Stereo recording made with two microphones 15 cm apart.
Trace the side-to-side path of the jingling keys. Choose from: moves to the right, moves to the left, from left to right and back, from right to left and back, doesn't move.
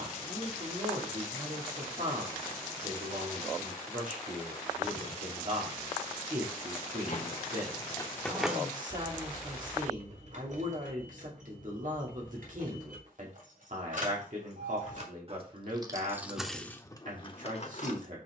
from left to right and back.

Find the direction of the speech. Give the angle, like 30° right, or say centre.
60° right.